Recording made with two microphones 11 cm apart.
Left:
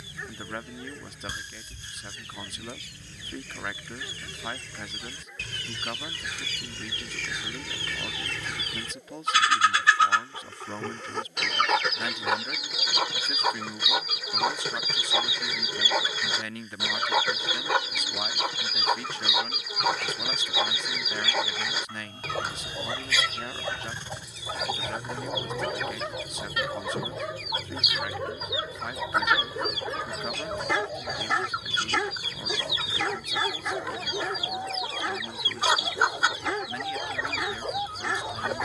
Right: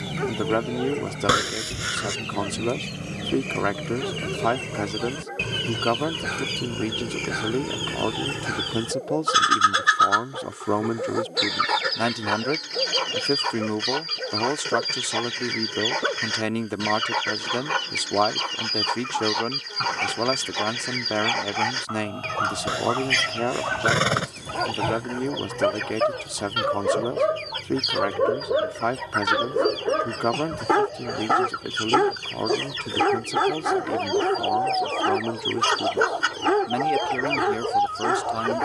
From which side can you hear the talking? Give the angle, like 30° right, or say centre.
70° right.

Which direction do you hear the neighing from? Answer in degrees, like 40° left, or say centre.
80° right.